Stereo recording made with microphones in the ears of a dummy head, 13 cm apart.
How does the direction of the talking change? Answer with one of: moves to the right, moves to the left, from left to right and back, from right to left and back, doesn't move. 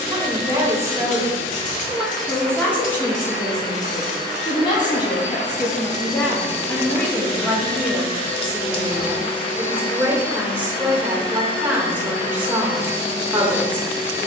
from right to left and back.